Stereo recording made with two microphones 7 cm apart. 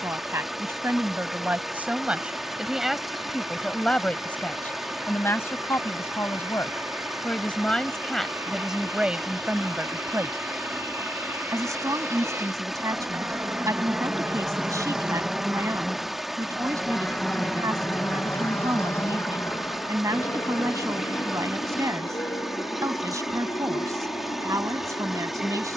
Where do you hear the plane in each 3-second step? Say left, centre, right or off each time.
right, right, right, right, right, centre, left, left, left.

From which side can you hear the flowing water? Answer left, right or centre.
centre.